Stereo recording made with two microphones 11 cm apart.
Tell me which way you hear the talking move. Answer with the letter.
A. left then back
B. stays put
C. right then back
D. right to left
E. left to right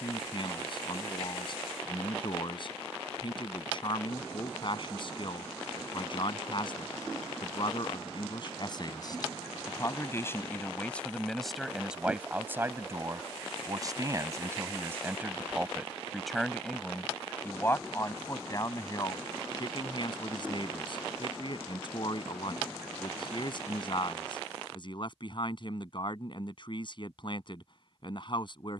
C.